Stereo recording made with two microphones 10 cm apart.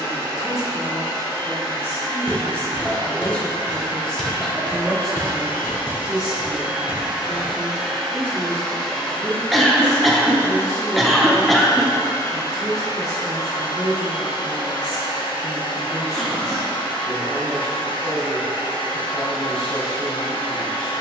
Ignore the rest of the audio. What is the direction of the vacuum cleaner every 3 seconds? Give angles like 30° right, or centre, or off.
40° right, 30° right, 10° right, 20° left, 50° left, 60° left, 60° left.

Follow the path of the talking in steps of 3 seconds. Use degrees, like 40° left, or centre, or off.
30° left, centre, 20° right, 40° right, 40° right, 40° right, 40° right.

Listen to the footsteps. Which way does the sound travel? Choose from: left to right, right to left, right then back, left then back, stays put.
right to left.